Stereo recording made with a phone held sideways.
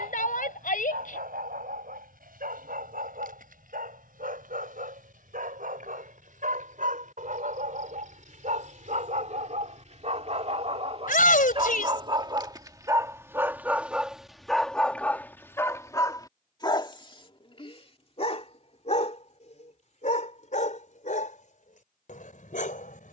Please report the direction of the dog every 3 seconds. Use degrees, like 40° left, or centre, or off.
80° right, 70° right, 60° right, 50° right, 10° right, 30° left, 50° left, 60° left.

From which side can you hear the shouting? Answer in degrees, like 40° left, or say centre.
70° left.